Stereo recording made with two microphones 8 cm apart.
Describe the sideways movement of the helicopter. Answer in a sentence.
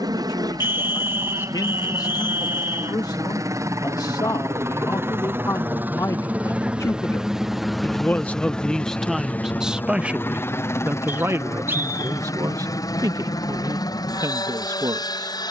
You can hear the helicopter move from right to left.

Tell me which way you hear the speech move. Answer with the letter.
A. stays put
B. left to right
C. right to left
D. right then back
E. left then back
B.